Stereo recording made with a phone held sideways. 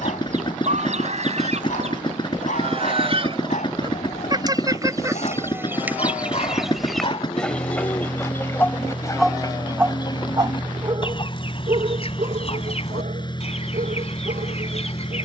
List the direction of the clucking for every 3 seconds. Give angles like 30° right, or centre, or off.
50° right, 30° right, 10° left, 30° left, 50° left.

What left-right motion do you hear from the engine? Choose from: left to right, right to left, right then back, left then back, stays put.
stays put.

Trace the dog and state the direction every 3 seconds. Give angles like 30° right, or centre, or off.
70° left, 60° left, 40° left, 30° right, 60° right.